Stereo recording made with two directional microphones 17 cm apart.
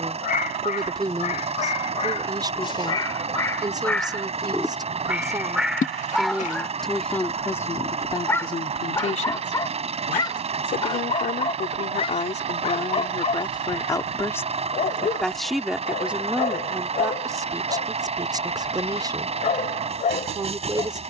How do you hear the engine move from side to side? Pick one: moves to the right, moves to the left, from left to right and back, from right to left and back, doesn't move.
doesn't move.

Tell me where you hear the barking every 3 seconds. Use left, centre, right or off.
left, centre, centre, left, left, left, left.